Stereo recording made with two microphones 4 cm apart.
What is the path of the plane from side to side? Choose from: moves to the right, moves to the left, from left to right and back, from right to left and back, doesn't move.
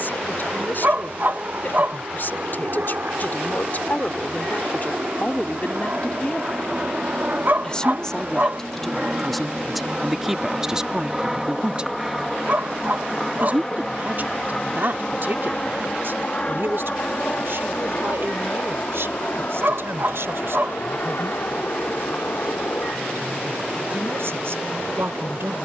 moves to the left.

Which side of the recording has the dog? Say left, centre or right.
right.